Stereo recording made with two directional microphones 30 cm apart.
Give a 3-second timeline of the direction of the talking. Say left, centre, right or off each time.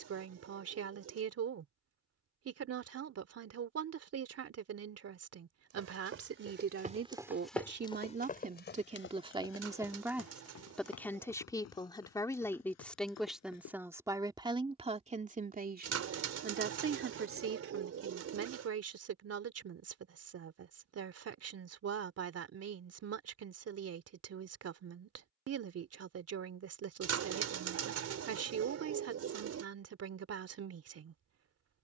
right, right, right, centre, centre, right, right, right, right, right, right.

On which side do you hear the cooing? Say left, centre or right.
right.